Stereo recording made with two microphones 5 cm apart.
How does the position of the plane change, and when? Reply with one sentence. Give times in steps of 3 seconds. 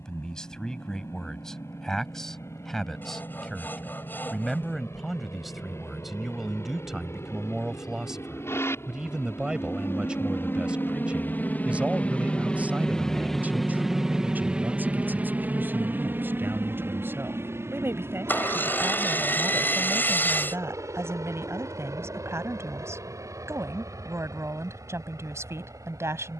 In this clip you hear the plane on the left from 0 s, in the centre from 12 s and on the right from 15 s.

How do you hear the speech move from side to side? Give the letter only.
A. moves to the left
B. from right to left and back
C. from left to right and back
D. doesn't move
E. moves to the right
E.